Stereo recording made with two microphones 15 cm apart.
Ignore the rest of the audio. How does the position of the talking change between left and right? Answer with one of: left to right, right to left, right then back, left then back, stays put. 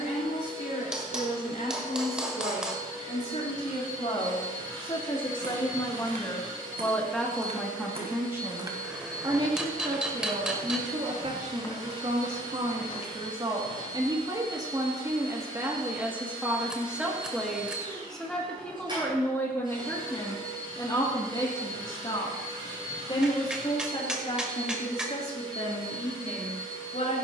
right then back.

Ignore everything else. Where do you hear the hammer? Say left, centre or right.
centre.